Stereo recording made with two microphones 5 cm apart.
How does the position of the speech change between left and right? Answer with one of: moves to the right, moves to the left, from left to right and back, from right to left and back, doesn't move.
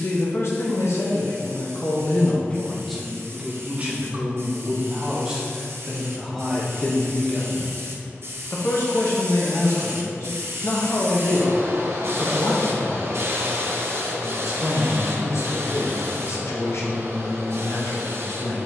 from left to right and back.